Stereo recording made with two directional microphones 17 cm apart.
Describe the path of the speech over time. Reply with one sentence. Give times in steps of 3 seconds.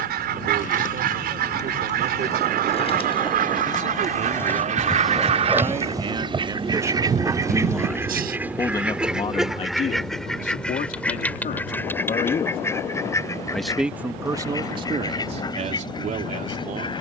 You can hear the speech on the right from 0 s, in the centre from 6 s, on the left from 9 s, in the centre from 12 s and on the right from 15 s.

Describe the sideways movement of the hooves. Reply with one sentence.
You can hear the hooves travel towards the right.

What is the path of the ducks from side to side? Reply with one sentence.
You can hear the ducks move from right to left.